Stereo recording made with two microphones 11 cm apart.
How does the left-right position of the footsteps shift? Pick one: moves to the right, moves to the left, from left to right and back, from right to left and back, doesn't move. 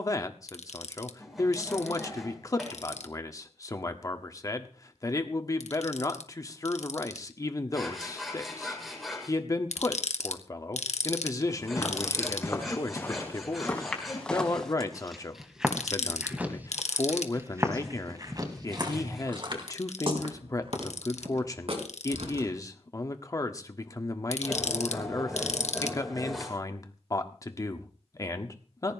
moves to the right.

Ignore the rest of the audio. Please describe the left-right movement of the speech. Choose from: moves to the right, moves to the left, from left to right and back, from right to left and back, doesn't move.
doesn't move.